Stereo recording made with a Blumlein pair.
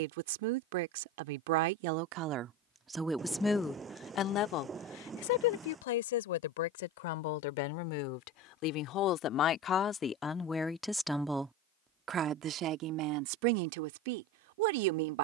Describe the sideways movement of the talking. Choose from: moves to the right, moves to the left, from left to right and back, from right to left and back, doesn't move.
from right to left and back.